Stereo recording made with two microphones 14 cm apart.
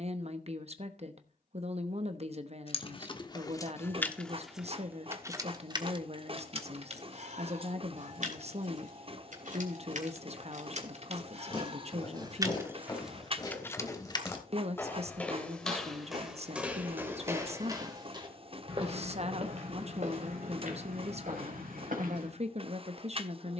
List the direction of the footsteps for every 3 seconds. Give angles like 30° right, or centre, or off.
off, off, off, 40° left, 30° left, 10° right, 50° right, 70° right.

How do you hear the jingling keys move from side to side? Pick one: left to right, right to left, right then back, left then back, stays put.
right then back.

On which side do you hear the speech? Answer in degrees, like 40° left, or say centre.
50° right.